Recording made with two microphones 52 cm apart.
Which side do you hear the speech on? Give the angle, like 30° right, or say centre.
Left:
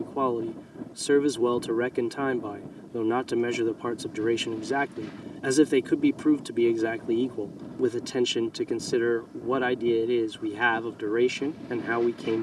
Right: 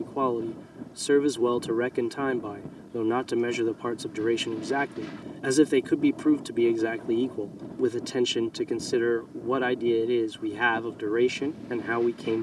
centre.